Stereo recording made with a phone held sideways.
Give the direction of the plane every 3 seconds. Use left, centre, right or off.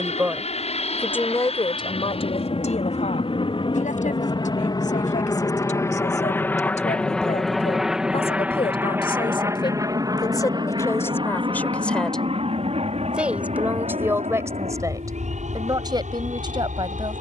left, left, centre, right, right, right.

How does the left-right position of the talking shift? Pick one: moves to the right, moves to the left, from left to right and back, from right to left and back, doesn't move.
from right to left and back.